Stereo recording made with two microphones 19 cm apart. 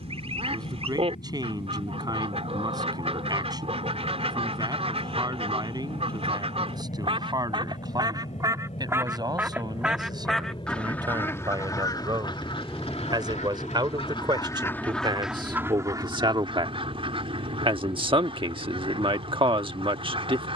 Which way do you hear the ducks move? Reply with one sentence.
You can hear the ducks move from right to left and back again.